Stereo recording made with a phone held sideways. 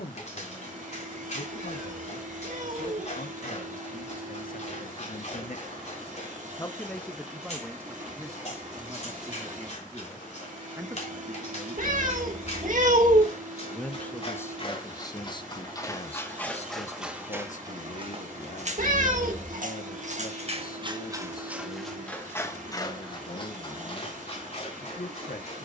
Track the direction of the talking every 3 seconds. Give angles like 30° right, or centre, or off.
80° left, 70° left, 10° right, 20° right, 20° left, 50° left, 70° left, 80° left, 80° left.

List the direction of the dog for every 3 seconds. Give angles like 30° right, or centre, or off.
50° left, 50° left, 50° left, 50° left, 50° left, 10° left, 50° right, 10° left, 50° left.